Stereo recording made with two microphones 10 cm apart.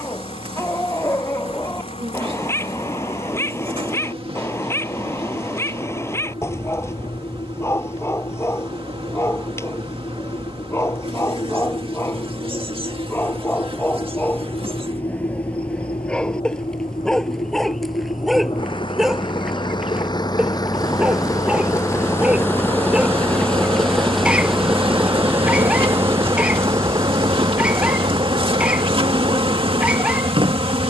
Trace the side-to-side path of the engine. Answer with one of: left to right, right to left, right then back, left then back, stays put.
left to right.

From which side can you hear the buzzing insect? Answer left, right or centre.
right.